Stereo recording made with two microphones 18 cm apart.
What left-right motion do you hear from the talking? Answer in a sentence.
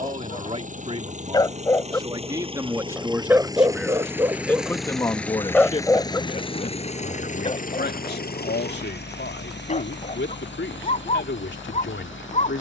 You can hear the talking move to the left.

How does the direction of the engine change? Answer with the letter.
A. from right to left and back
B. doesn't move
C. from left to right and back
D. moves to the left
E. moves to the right
D.